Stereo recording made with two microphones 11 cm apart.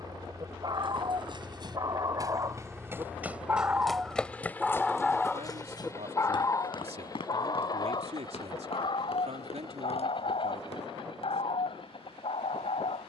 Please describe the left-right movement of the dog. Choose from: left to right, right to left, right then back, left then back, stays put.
right to left.